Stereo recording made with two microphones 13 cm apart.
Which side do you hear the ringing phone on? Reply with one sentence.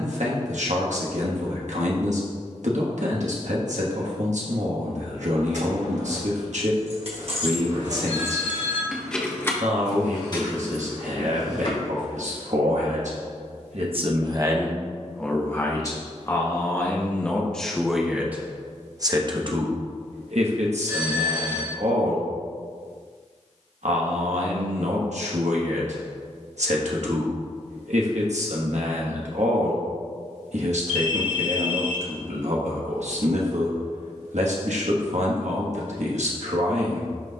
You can hear the ringing phone on the right.